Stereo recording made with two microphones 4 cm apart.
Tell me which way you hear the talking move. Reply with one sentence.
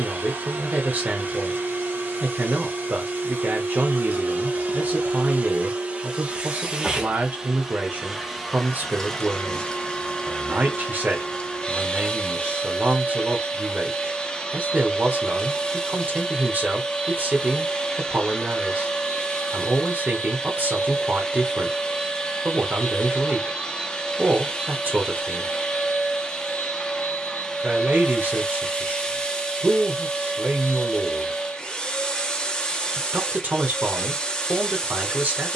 In this clip you hear the talking stay put.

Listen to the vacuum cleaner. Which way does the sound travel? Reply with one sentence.
You can hear the vacuum cleaner move to the left.